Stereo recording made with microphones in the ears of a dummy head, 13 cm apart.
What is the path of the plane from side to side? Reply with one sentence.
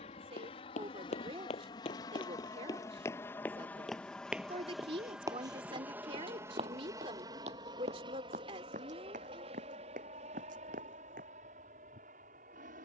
In this clip you hear the plane move from left to right.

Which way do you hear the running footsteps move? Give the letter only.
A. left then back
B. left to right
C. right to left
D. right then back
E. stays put
B.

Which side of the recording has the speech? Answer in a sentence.
In this clip you hear the speech on the right.